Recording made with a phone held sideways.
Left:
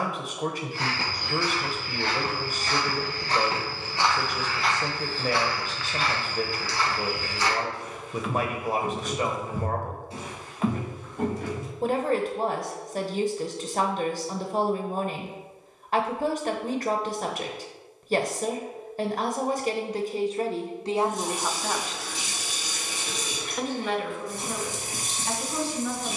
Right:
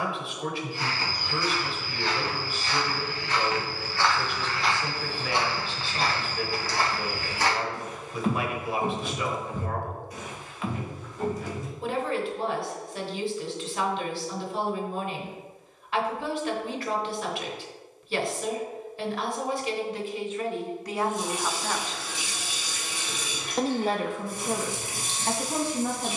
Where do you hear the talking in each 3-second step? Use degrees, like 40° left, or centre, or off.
40° left, 40° left, 40° left, 40° left, 40° left, 40° left, 40° left, centre, 50° right.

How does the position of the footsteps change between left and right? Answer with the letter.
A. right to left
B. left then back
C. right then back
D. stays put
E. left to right
C.